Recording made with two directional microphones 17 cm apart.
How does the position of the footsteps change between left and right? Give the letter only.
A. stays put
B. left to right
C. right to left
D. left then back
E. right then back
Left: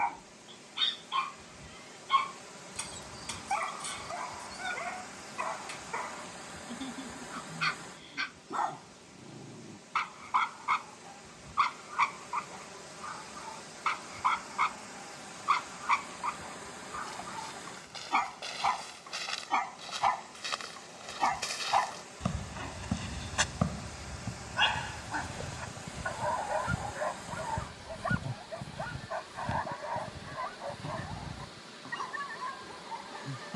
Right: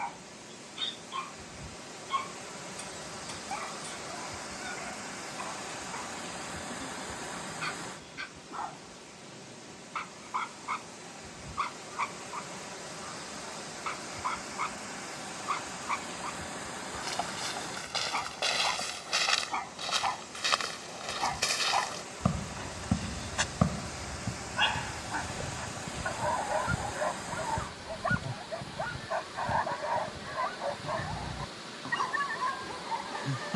C.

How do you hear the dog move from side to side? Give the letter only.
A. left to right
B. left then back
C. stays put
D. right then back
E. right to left
A.